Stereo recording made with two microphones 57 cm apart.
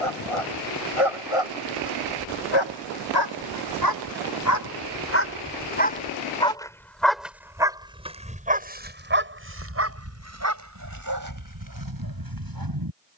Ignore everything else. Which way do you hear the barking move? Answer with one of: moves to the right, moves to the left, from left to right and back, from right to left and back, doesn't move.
moves to the right.